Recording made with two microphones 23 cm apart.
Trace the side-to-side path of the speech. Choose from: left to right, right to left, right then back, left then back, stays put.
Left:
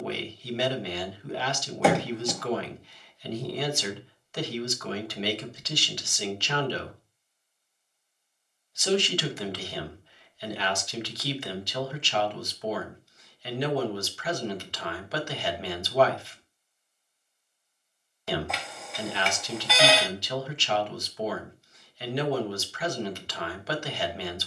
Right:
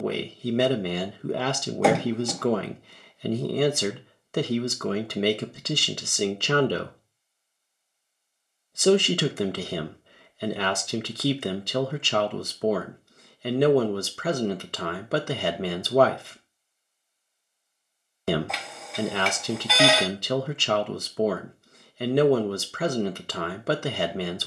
stays put.